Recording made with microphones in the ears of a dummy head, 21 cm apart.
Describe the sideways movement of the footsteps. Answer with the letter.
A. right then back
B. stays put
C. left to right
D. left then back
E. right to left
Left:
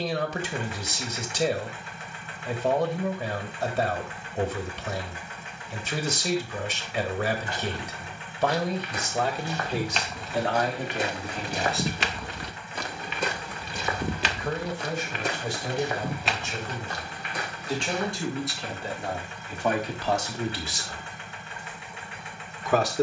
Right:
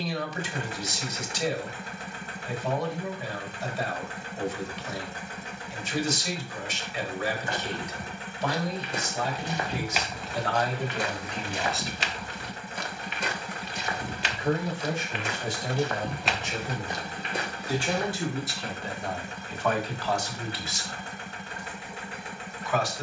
D.